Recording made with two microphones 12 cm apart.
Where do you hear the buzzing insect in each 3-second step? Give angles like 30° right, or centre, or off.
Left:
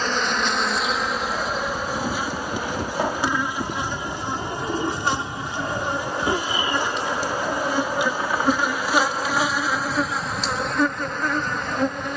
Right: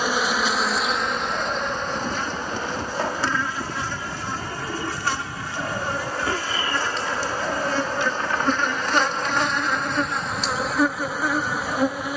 centre, 20° left, 10° left, centre.